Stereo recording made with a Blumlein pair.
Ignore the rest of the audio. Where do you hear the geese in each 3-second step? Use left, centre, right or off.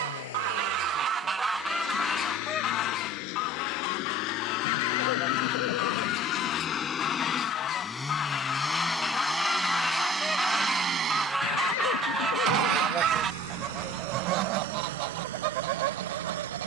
centre, left, left, centre, right, right.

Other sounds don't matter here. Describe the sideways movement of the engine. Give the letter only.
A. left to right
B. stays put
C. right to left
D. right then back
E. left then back
A.